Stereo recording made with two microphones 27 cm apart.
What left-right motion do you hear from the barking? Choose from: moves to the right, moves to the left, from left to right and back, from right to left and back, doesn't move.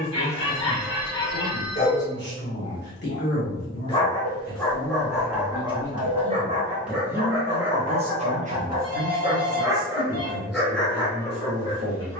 from left to right and back.